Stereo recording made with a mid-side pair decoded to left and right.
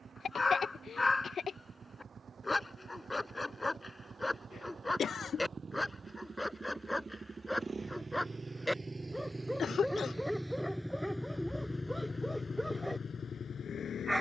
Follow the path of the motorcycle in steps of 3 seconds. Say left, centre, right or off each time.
right, right, right, centre, left.